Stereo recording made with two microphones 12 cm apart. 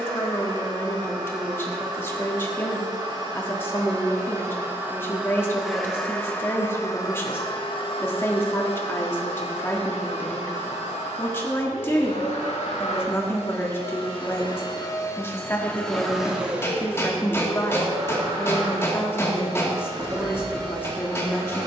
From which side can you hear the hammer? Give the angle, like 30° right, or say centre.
20° left.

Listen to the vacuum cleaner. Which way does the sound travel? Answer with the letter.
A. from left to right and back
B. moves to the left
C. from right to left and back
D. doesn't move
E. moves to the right
C.